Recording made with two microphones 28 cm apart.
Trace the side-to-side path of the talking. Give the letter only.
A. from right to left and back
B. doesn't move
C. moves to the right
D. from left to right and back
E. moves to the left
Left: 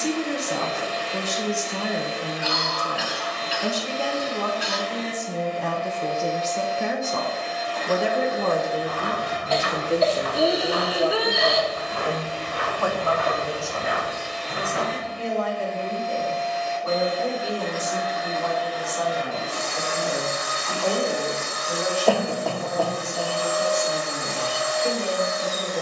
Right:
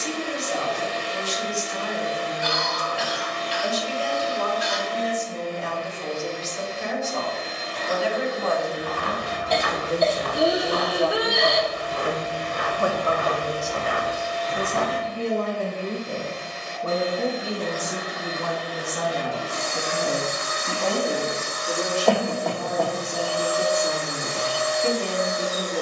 C.